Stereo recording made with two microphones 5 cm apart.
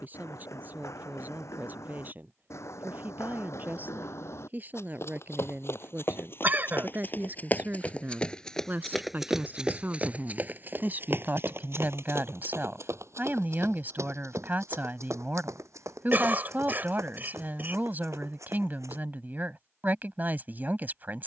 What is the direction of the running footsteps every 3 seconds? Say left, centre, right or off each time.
left, left, left, right, right, right, right.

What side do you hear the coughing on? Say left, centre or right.
right.